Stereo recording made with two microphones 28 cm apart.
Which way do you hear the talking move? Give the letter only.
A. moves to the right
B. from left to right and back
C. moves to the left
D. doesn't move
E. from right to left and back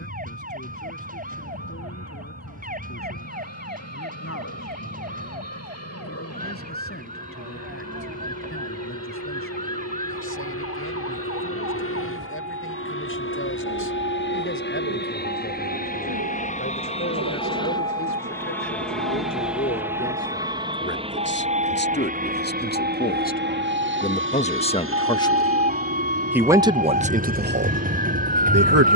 A.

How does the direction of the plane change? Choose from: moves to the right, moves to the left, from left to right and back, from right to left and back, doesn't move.
moves to the right.